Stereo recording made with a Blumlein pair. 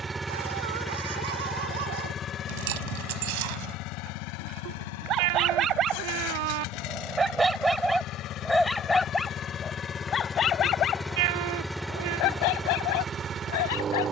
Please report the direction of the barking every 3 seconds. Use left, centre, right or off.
right, right, centre, left, left.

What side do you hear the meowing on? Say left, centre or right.
right.